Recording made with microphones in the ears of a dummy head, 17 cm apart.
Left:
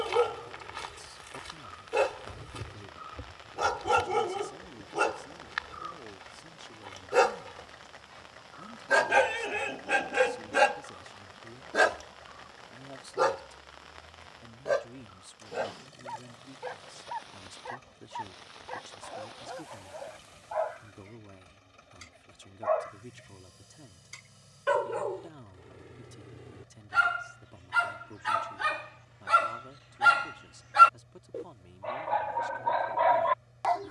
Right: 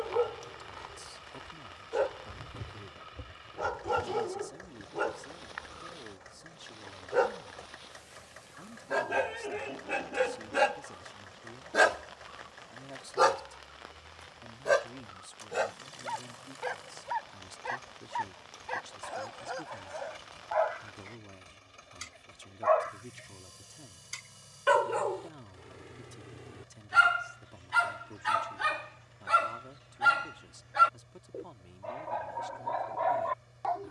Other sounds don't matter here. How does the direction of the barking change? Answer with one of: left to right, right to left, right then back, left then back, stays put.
right then back.